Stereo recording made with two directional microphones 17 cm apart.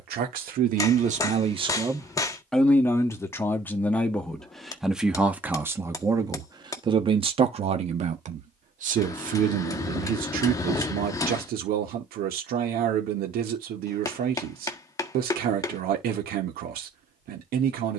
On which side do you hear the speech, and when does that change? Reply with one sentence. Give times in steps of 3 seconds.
In this clip you hear the speech on the right from 0 s, in the centre from 3 s and on the right from 6 s.